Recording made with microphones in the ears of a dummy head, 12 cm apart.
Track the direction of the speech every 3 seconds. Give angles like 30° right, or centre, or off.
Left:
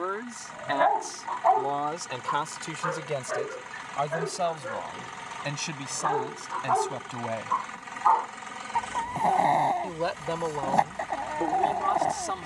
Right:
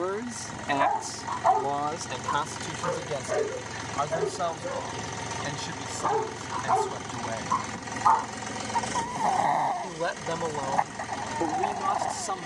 centre, 20° left, 20° left, centre.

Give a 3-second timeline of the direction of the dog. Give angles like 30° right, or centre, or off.
10° left, 20° right, centre, 30° left.